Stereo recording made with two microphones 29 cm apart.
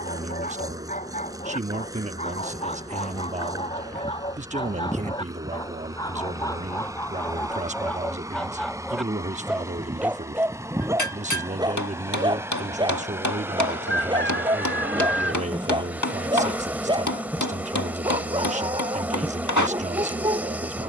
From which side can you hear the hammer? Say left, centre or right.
left.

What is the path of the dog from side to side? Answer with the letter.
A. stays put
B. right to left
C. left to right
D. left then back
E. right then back
C.